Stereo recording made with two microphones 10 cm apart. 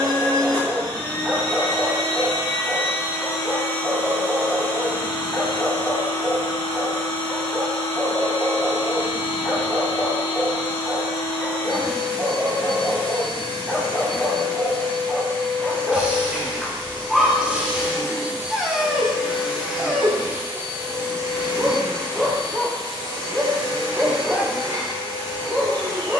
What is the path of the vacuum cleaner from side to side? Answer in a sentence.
You can hear the vacuum cleaner move to the right.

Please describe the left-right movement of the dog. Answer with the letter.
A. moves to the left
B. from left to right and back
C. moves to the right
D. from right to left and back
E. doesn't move
E.